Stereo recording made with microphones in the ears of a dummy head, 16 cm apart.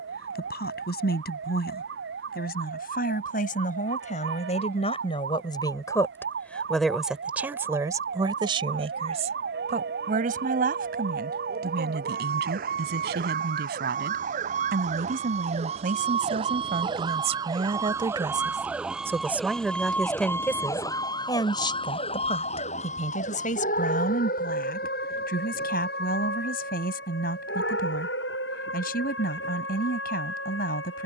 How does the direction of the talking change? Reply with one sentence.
In this clip you hear the talking move from left to right and back again.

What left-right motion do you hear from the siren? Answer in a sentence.
You can hear the siren move from right to left.